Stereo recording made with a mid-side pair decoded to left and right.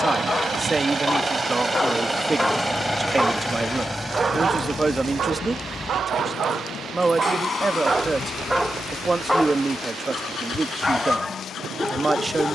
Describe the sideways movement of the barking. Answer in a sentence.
You can hear the barking go right and come back.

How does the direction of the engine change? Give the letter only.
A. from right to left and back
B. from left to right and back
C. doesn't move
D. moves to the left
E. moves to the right
D.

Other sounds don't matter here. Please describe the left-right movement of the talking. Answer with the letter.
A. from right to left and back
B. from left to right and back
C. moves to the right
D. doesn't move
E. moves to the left
D.